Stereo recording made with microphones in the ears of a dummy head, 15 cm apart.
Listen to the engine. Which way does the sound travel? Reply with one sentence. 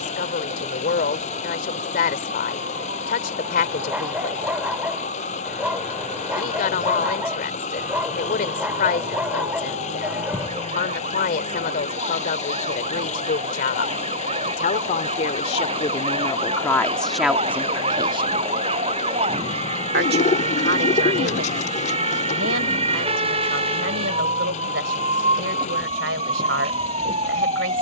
You can hear the engine stay put.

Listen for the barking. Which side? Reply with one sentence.
In this clip you hear the barking in the centre.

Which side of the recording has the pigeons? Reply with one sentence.
You can hear the pigeons on the left.